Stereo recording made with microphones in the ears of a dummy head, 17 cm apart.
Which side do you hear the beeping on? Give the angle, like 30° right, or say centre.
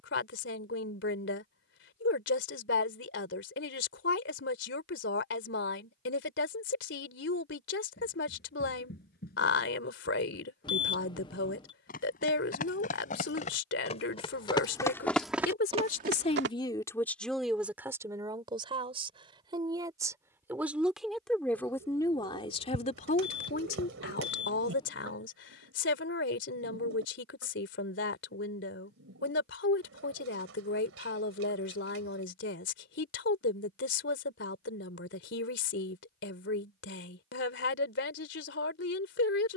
20° left.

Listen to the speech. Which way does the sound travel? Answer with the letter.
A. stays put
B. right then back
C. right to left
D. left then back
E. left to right
B.